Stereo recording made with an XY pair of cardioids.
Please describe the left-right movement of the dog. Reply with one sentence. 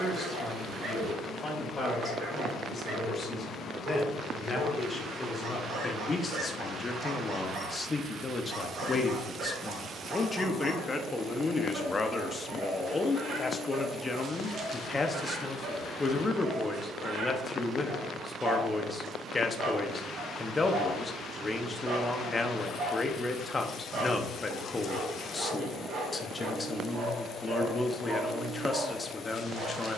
In this clip you hear the dog stay put.